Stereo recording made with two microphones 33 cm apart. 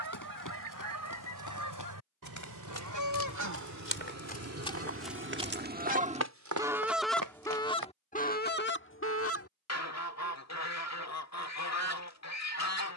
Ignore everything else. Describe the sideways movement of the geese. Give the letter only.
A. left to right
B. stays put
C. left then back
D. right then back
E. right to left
E.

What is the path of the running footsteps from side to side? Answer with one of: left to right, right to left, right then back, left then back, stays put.
left to right.